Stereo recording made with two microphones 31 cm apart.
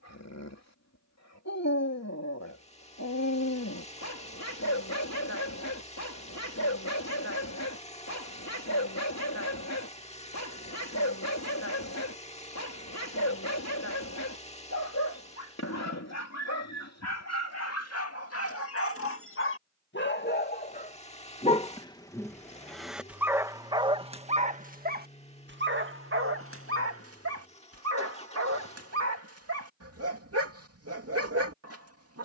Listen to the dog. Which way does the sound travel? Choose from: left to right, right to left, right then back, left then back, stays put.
left to right.